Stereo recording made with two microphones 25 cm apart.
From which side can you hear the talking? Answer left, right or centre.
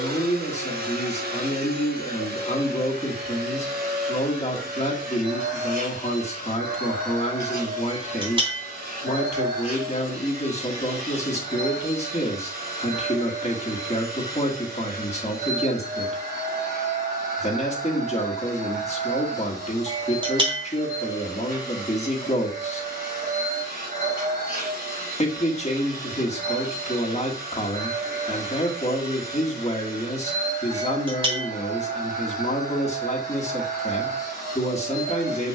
left.